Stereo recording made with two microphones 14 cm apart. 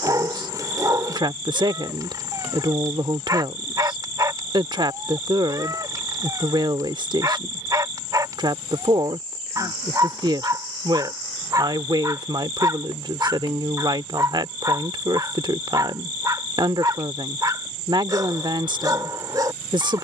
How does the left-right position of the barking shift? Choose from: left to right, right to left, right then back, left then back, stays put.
stays put.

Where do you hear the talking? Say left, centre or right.
right.